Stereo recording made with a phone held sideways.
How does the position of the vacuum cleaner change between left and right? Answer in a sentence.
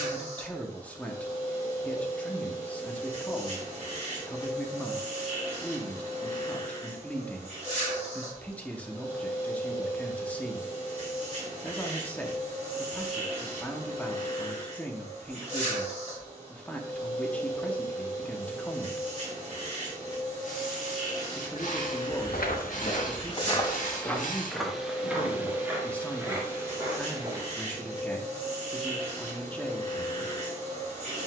In this clip you hear the vacuum cleaner stay in one place.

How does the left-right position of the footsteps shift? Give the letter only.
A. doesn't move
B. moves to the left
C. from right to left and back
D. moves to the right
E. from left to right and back
D.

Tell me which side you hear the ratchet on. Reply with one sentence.
In this clip you hear the ratchet on the left.